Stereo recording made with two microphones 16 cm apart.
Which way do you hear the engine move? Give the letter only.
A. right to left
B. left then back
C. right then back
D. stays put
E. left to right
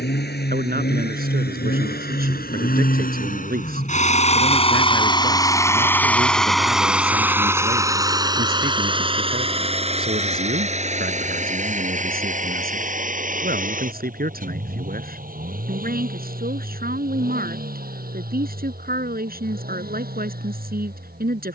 E.